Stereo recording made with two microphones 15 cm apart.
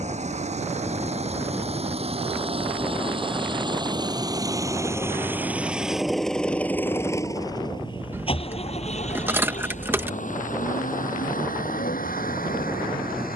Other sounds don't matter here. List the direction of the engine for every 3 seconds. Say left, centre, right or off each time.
right, right, left, left, left.